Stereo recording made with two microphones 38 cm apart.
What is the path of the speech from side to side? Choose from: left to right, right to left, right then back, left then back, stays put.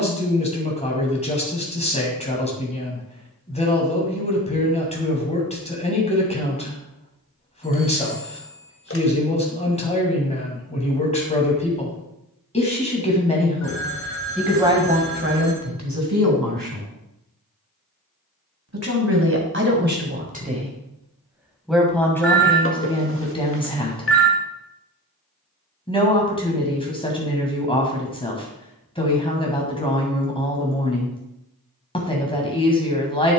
right then back.